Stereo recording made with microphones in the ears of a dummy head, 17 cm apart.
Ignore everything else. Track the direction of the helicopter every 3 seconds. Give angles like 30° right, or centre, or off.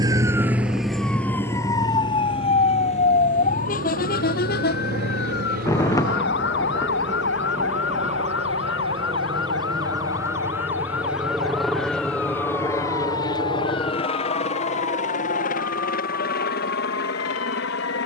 60° right, 50° right, 40° right, 10° right, 20° left, 50° left.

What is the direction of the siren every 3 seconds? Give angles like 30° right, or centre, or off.
10° left, 50° left, 60° left, 70° left, 70° left, 70° left.